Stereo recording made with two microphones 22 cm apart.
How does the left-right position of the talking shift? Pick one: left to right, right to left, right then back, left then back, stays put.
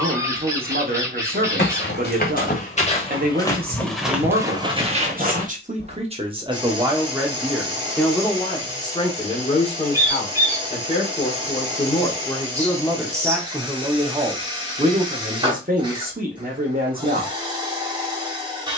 left then back.